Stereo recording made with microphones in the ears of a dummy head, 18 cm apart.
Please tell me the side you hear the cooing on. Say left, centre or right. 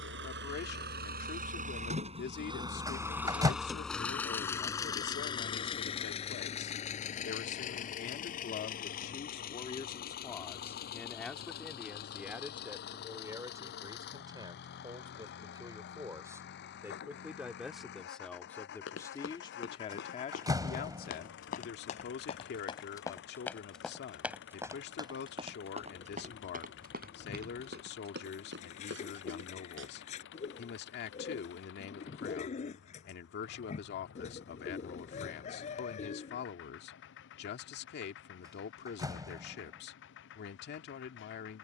left.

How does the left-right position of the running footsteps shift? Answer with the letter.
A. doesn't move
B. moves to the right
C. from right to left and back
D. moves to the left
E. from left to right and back
B.